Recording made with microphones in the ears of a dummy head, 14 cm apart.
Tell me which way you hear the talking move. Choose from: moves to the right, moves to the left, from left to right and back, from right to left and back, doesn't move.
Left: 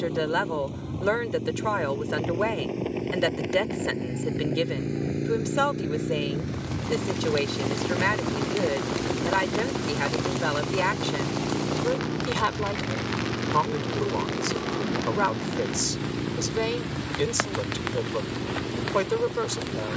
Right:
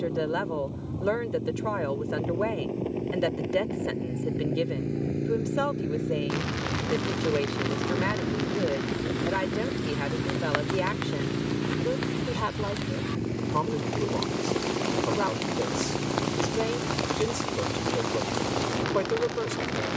doesn't move.